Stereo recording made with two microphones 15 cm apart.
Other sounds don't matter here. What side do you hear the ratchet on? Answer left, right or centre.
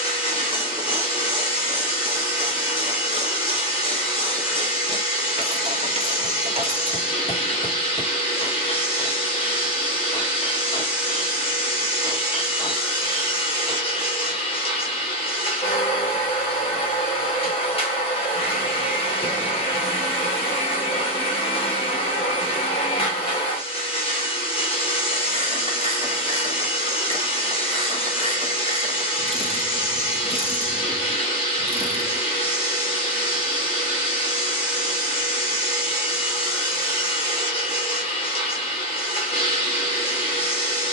right.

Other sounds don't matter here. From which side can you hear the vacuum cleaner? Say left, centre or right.
left.